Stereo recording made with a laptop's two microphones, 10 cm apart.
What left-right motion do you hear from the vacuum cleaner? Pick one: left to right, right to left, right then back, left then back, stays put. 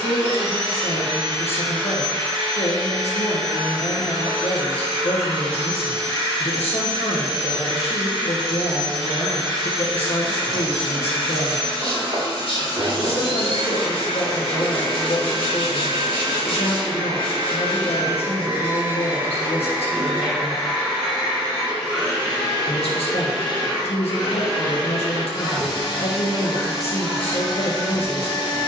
right to left.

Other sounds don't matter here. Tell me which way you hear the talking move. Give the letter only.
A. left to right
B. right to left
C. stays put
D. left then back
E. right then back
C.